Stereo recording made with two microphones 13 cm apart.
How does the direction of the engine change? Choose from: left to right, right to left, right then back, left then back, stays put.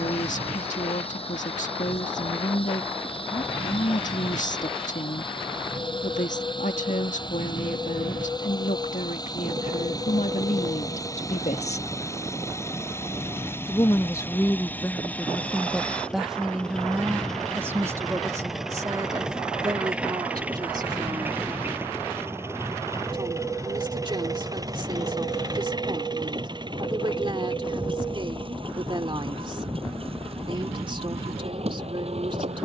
left to right.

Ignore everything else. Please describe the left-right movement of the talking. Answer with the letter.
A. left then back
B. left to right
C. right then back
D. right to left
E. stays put
B.